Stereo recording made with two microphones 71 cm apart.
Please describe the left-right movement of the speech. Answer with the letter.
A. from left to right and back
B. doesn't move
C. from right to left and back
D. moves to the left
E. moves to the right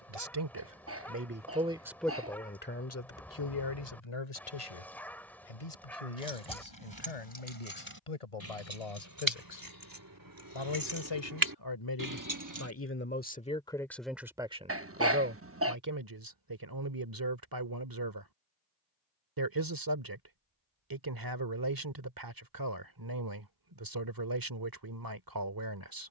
C.